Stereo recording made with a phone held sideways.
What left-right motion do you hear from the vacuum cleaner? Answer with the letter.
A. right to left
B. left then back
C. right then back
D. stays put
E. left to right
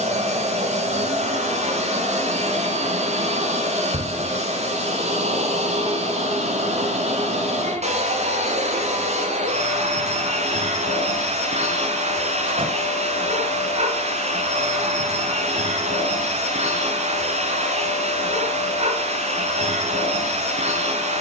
D.